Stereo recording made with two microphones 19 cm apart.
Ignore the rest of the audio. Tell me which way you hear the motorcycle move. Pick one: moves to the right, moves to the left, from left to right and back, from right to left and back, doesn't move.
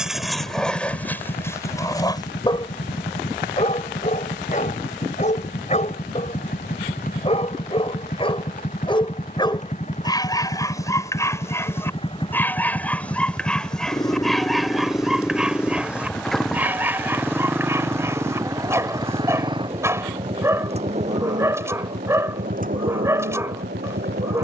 moves to the right.